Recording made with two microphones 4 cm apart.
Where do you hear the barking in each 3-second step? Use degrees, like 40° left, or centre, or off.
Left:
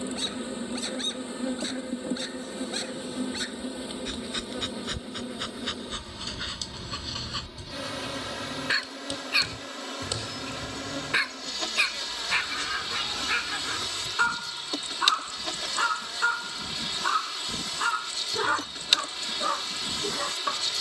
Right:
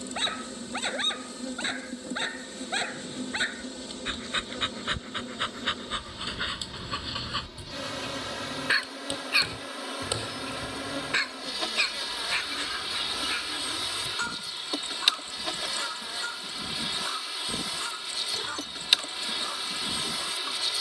40° right, 30° right, 10° right, 10° left, 20° left, 40° left, 40° left.